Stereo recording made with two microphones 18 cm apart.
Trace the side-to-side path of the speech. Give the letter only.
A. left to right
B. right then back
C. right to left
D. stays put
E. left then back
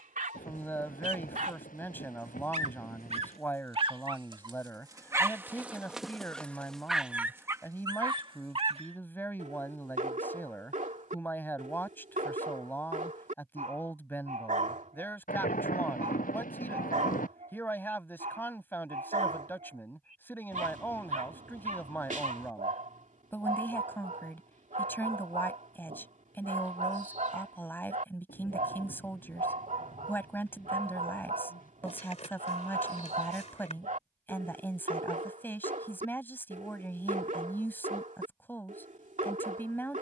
D.